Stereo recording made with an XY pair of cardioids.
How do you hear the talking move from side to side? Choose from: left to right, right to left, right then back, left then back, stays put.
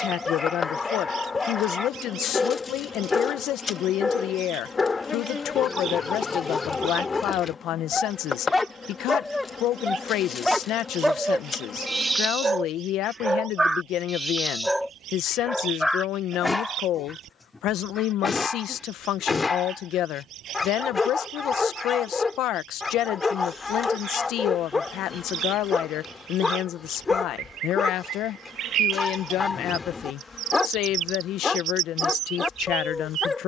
stays put.